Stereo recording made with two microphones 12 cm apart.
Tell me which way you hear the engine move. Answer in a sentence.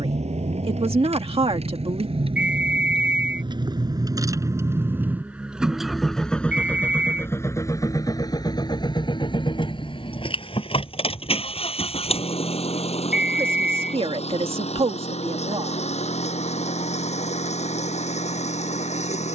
In this clip you hear the engine go from the right side to the left.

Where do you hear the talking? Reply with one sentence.
You can hear the talking on the right.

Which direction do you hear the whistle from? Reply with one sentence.
You can hear the whistle in the centre.